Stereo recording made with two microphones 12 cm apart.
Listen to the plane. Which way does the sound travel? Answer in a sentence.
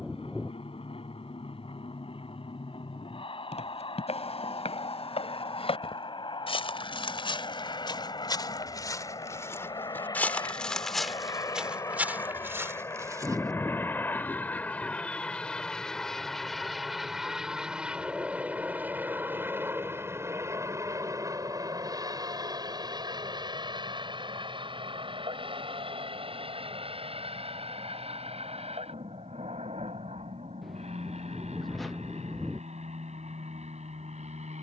In this clip you hear the plane go from the left side to the right.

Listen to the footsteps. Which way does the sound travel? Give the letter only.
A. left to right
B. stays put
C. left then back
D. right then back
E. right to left
A.